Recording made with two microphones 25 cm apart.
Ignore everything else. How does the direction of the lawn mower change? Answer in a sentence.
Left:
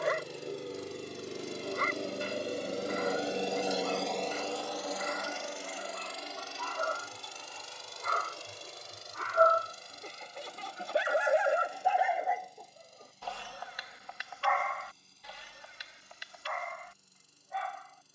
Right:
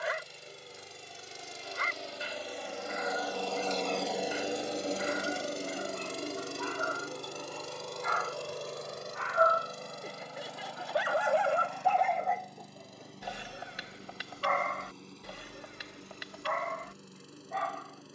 In this clip you hear the lawn mower go from the left side to the right.